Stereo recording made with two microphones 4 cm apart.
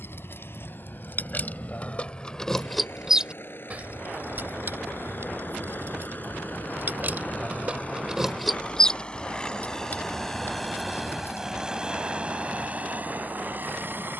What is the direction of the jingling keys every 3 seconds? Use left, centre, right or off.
left, right, right, left, off.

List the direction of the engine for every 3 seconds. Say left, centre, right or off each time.
left, left, left, centre, right.